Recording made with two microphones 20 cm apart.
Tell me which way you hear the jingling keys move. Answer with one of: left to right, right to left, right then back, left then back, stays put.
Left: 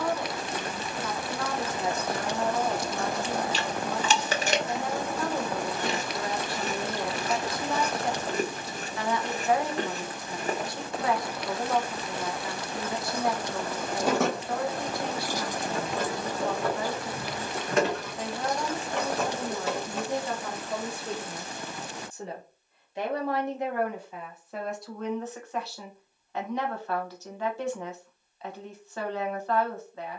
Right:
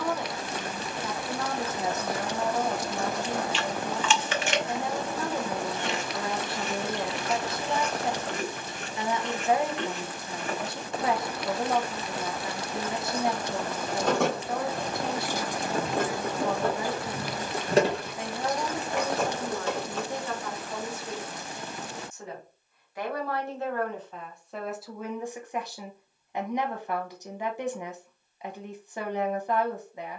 right then back.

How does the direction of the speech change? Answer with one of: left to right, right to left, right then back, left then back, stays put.
left then back.